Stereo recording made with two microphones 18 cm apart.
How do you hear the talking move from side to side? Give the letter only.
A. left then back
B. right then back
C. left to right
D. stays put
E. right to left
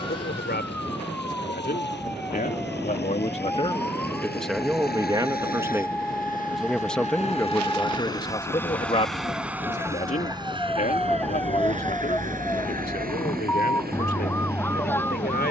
B.